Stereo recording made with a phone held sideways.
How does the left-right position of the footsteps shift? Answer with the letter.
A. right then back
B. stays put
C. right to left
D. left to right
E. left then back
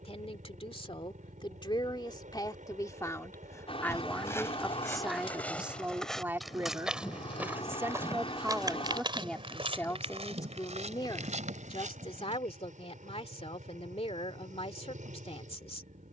D.